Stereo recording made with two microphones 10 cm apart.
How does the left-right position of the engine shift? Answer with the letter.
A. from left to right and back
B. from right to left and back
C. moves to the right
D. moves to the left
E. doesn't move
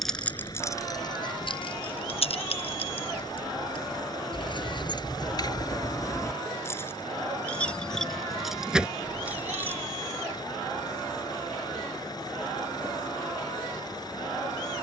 E.